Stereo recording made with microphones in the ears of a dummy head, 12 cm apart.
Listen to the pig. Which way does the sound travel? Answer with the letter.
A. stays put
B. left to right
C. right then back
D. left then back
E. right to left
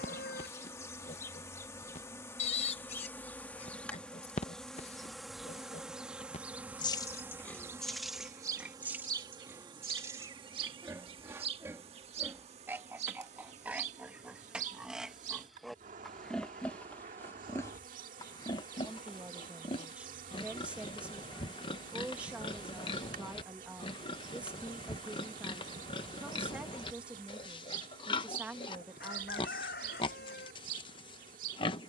C.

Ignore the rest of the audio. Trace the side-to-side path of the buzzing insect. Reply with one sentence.
In this clip you hear the buzzing insect move from left to right.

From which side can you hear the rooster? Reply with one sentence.
You can hear the rooster on the left.